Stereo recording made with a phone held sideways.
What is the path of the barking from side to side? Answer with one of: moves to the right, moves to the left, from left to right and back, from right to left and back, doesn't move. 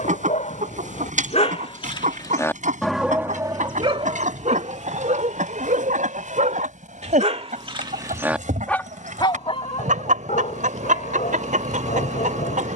from left to right and back.